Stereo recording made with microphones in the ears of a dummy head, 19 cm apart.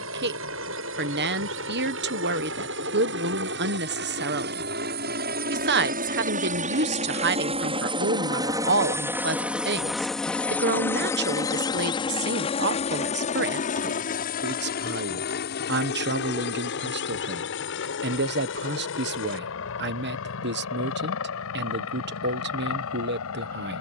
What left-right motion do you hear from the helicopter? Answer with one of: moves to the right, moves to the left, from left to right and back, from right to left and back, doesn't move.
moves to the left.